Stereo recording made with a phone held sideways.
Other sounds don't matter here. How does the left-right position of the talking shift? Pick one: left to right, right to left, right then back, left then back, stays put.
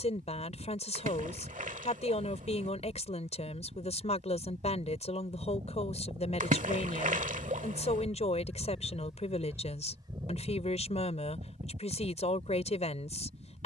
stays put.